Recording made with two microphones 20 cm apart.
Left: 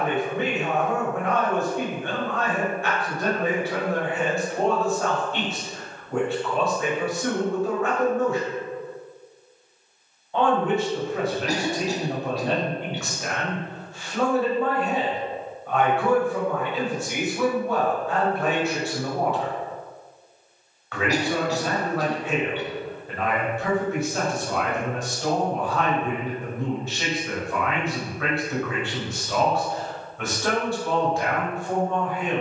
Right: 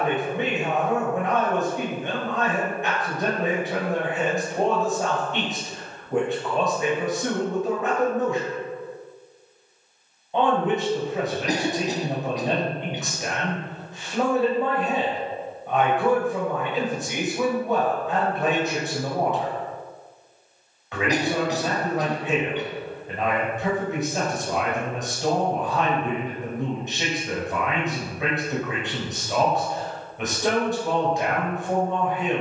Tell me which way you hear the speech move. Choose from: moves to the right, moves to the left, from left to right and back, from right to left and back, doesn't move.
doesn't move.